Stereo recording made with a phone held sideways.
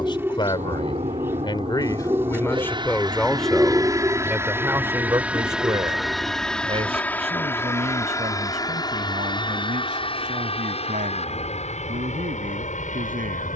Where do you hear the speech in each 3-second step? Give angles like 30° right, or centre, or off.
20° left, 10° right, 40° right, 50° right, 60° right.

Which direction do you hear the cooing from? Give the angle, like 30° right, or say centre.
10° right.